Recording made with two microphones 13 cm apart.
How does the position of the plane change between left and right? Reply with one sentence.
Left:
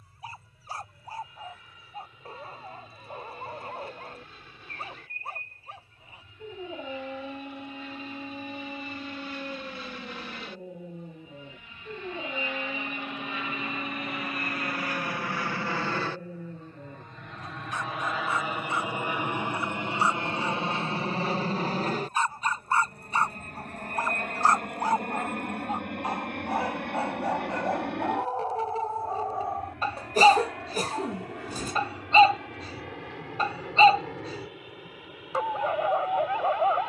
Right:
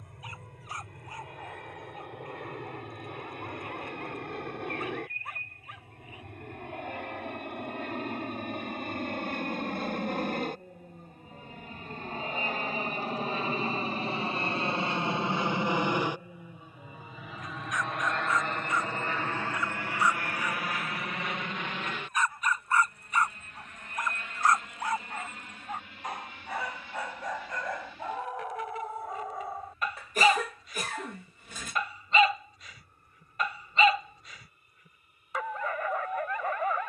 You can hear the plane travel towards the left.